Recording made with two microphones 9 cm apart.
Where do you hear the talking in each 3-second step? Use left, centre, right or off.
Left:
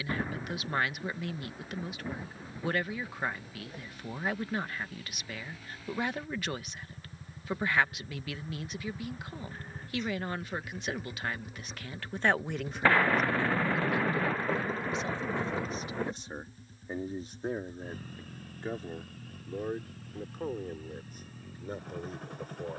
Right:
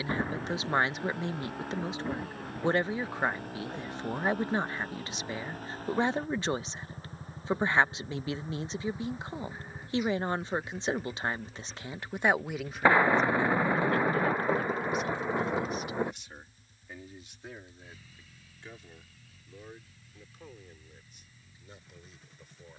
right, right, right, right, centre, left, left, left.